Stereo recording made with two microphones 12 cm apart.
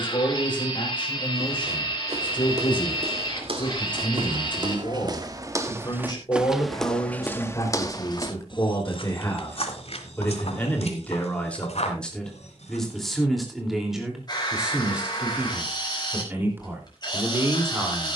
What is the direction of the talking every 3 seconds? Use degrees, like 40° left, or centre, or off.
40° left, 40° left, 30° left, 20° left, centre, 20° right.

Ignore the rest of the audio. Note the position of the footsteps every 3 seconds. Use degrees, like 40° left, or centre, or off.
60° right, 40° right, 20° left, 60° left, 70° left, off.